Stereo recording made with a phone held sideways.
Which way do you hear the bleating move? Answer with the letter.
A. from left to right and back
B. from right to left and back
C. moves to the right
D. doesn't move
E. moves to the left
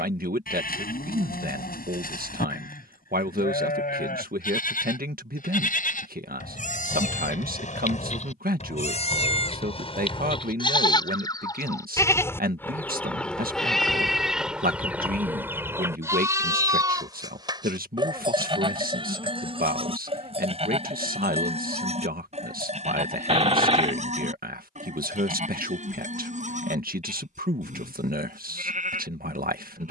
C.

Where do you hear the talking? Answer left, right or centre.
right.